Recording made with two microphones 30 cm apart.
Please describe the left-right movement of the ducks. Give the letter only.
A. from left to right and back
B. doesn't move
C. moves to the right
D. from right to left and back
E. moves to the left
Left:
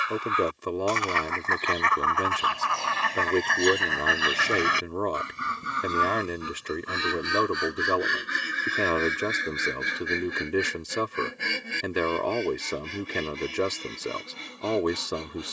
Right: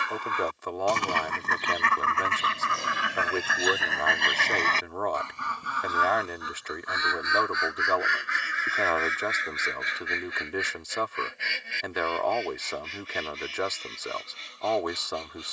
E.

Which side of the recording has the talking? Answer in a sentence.
In this clip you hear the talking on the left.